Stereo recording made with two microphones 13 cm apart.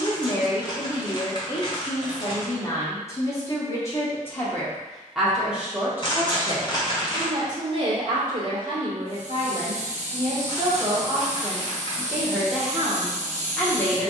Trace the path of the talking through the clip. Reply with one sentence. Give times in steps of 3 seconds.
You can hear the talking on the left from 0 s, in the centre from 3 s, on the right from 6 s and in the centre from 12 s.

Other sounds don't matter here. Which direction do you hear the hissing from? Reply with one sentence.
In this clip you hear the hissing on the right.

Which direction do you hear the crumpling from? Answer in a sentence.
You can hear the crumpling on the left.